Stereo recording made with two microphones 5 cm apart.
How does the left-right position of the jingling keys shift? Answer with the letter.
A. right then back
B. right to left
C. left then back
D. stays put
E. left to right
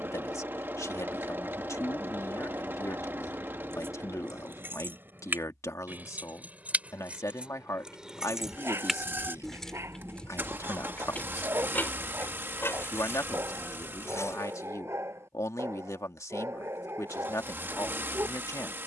B.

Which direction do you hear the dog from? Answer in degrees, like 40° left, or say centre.
50° right.